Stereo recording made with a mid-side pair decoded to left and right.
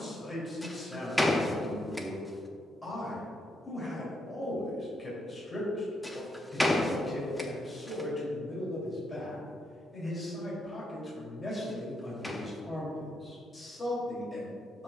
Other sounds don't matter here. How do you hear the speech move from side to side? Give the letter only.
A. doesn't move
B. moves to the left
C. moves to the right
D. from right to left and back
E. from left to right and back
A.